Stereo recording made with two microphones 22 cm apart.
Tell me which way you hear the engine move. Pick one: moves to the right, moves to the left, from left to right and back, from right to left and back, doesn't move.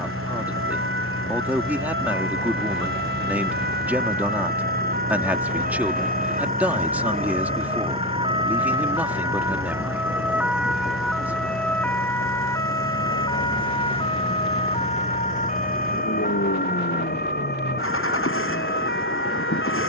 doesn't move.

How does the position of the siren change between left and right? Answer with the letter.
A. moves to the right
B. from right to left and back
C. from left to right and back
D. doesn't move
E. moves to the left
E.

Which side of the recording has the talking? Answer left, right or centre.
centre.